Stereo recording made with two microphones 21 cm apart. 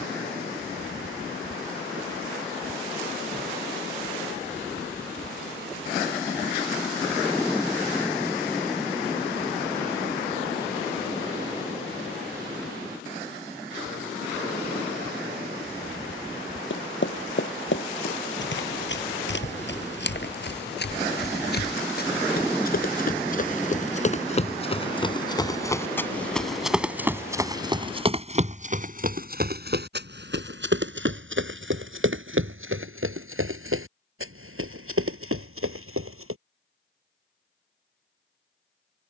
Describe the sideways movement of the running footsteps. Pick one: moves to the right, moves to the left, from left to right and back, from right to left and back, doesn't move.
moves to the right.